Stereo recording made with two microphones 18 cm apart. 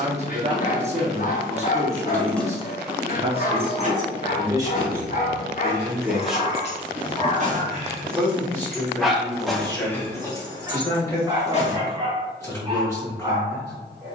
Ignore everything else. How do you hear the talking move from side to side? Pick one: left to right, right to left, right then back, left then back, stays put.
right to left.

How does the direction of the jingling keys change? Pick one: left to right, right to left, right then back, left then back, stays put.
right then back.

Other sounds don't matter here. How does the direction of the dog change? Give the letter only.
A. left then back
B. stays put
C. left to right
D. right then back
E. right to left
C.